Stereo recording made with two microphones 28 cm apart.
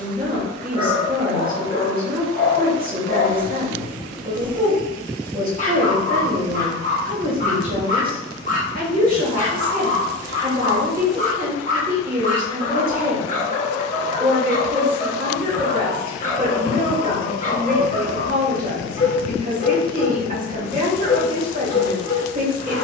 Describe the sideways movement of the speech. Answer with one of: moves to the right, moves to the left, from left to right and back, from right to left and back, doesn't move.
doesn't move.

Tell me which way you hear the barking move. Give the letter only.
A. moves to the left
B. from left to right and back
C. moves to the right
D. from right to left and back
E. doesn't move
E.